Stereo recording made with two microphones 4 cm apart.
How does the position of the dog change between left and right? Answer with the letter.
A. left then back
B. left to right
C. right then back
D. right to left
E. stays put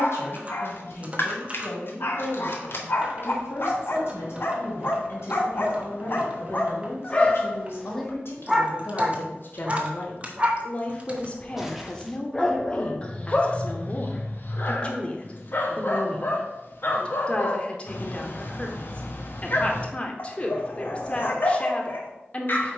C.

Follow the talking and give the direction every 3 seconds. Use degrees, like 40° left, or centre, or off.
60° left, 60° left, 60° left, 30° left, 20° left, 20° left, 20° left, 20° left.